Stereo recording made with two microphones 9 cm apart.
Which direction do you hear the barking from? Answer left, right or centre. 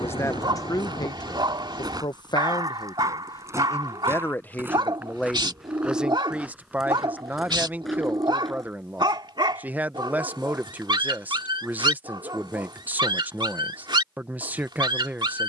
right.